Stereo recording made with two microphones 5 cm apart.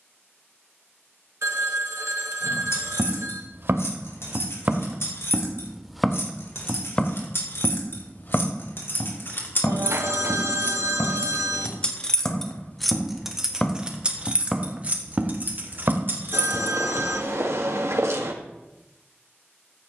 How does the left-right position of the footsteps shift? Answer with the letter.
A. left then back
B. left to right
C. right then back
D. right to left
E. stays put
A.